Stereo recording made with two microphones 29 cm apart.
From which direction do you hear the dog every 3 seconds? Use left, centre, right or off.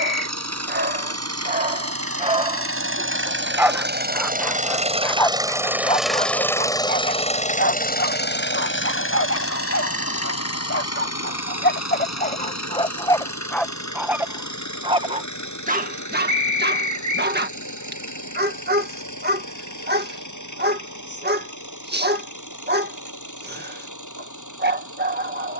right, centre, left, left, centre, right, right, right, right.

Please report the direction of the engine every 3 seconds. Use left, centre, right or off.
right, right, left, left, left, left, left, left, left.